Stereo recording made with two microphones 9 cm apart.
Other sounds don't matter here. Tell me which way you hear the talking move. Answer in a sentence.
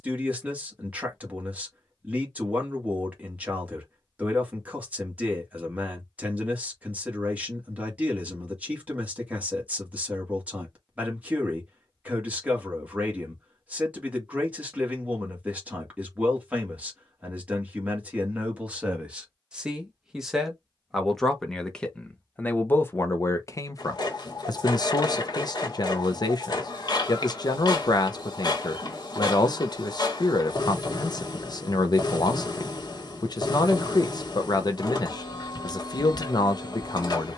In this clip you hear the talking move to the left.